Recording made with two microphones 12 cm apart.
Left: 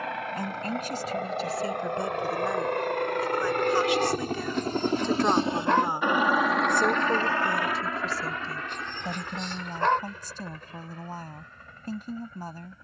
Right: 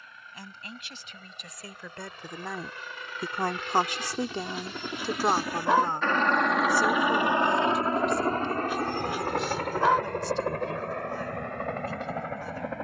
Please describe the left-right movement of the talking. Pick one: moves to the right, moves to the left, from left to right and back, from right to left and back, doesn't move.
from left to right and back.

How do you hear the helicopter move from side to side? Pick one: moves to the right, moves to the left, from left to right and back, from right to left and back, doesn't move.
moves to the right.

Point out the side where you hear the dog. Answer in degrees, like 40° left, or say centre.
10° right.